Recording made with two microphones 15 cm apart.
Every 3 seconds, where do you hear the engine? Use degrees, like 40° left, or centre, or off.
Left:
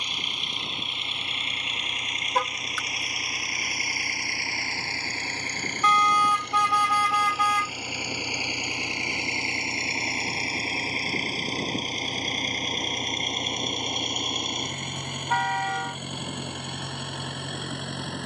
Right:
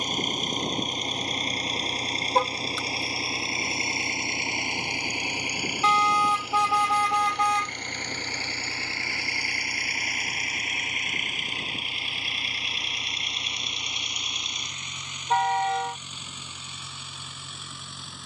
40° right, 20° right, 10° left, 30° left, 50° left, 60° left.